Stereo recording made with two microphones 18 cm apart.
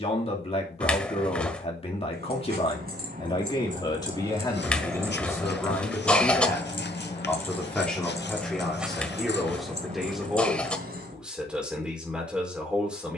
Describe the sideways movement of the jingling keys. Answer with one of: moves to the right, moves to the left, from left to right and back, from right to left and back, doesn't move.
from right to left and back.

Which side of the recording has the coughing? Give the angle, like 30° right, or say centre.
10° left.